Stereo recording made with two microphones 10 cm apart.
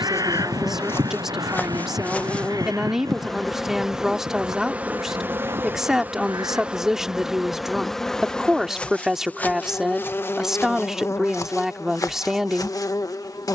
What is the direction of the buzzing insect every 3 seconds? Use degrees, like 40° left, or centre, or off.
20° left, 10° right, centre, 20° left, 40° left.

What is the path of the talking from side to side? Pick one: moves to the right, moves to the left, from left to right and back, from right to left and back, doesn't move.
doesn't move.